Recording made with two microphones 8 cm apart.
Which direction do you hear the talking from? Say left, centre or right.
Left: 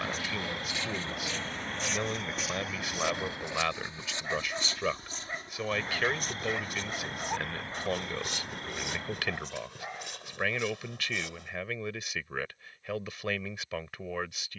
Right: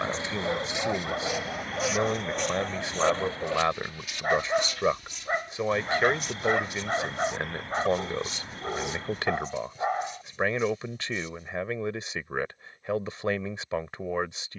right.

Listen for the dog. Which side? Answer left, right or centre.
right.